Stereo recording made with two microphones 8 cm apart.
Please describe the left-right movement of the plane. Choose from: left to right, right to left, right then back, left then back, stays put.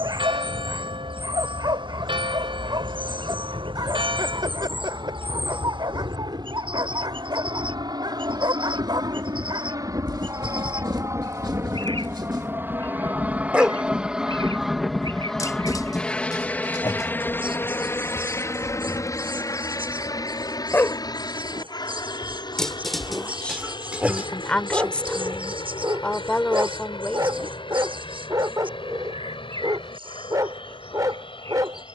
right to left.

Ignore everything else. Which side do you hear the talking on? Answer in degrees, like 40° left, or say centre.
10° left.